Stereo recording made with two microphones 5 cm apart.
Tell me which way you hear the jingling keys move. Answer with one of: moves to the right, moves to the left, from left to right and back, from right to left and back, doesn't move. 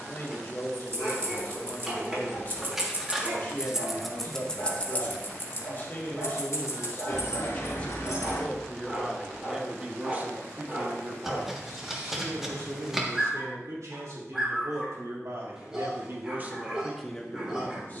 moves to the left.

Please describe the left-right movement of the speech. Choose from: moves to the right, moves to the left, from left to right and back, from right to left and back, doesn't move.
from left to right and back.